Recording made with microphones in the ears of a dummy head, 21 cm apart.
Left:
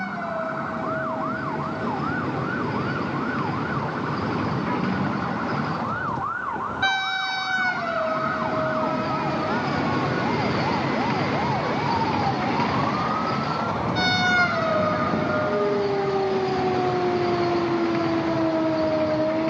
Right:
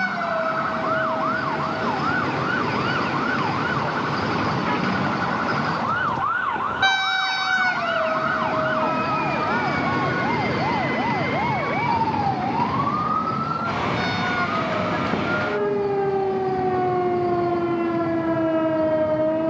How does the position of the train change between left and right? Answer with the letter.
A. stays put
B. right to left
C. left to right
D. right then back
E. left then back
B.